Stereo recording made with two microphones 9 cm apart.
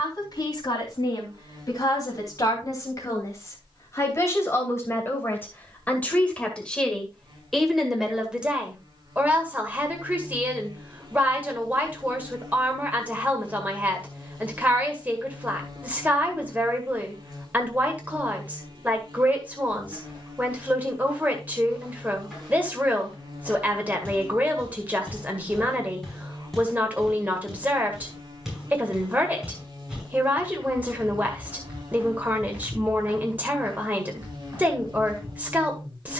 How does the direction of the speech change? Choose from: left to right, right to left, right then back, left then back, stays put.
left to right.